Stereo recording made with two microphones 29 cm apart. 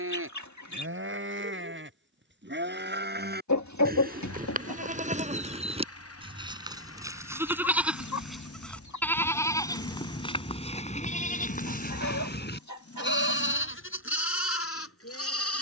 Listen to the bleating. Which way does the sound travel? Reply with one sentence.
In this clip you hear the bleating move from right to left.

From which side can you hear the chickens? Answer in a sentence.
In this clip you hear the chickens on the left.